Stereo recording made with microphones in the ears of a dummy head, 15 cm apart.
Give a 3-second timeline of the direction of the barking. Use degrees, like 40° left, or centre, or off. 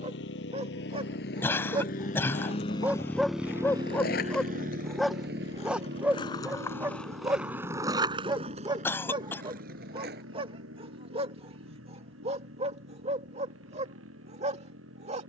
30° right, centre, 20° right, 30° right, 40° right.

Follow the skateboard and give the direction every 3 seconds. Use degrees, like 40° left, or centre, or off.
70° left, 50° left, 10° right, 50° right, off.